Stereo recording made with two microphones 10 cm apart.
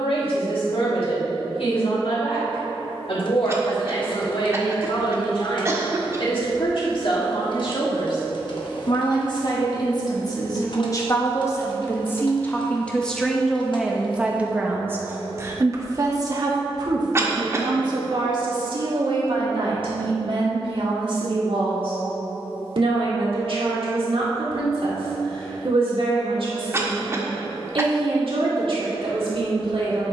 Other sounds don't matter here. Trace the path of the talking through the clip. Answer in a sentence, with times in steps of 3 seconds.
You can hear the talking on the left from 0 s, in the centre from 12 s and on the right from 15 s.